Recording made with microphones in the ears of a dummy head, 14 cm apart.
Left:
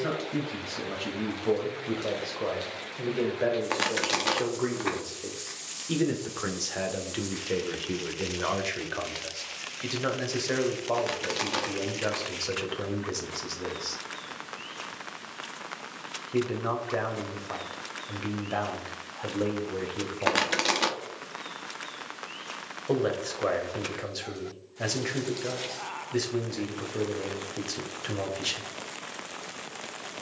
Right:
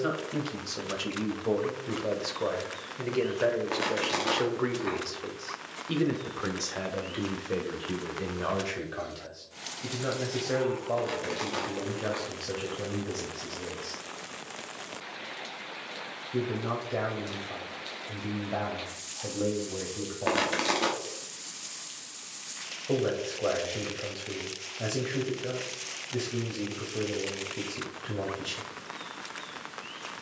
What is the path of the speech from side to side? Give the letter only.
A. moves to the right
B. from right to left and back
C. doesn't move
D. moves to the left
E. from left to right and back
D.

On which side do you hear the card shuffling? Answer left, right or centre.
left.